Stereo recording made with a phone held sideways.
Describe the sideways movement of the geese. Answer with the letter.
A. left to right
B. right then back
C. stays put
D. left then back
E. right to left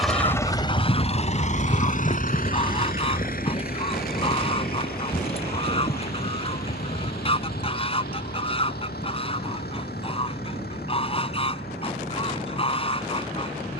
C.